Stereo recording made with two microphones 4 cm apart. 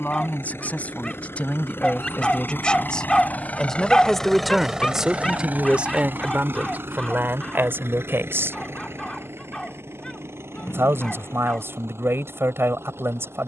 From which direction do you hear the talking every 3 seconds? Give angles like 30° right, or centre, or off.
30° left, 10° right, 60° right, 80° right, 80° right.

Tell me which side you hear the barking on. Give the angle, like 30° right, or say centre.
10° left.